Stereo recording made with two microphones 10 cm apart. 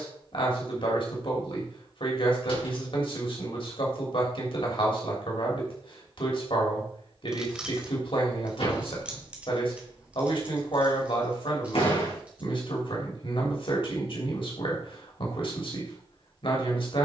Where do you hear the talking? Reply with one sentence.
You can hear the talking on the left.